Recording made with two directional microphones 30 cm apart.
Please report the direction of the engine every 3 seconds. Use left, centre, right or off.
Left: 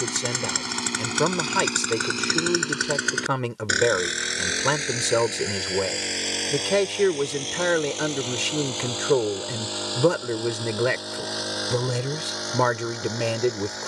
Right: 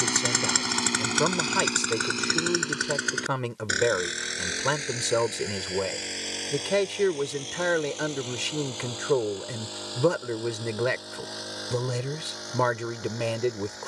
centre, left, left, left, left.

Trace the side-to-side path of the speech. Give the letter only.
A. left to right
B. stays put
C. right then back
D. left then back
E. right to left
B.